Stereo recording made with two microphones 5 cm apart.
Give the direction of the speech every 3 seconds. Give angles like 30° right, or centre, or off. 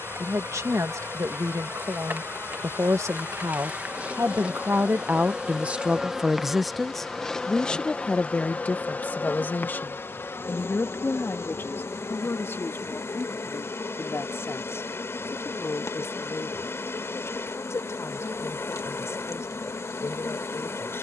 80° right, 50° right, 10° left, 40° left, 50° left, 60° left, 60° left.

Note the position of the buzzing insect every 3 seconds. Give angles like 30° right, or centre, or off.
40° right, 20° right, 10° left, 50° left, 70° left, 70° left, 70° left.